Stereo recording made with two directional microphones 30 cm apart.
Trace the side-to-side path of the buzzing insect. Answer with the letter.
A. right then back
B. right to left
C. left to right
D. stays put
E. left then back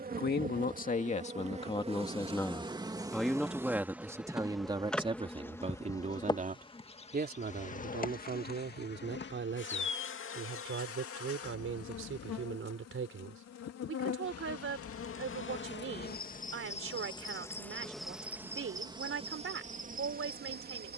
E.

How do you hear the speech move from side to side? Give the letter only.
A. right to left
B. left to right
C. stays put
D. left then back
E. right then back
B.